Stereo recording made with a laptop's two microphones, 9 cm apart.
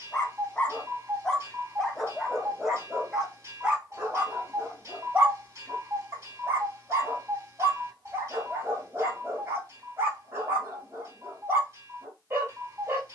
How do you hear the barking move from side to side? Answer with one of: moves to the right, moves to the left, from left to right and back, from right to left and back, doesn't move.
moves to the right.